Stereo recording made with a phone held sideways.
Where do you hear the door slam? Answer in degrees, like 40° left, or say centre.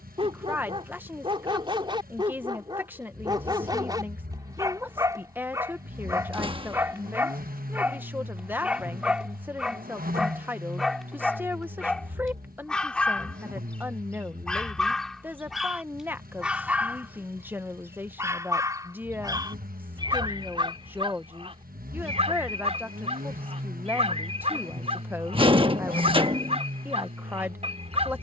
30° right.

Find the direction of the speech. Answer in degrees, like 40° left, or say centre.
10° right.